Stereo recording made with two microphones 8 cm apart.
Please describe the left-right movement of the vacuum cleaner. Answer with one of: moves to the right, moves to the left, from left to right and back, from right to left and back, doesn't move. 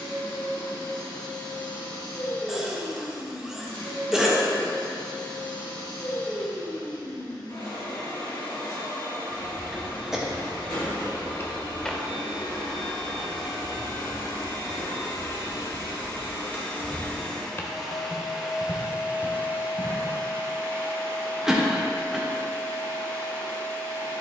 moves to the right.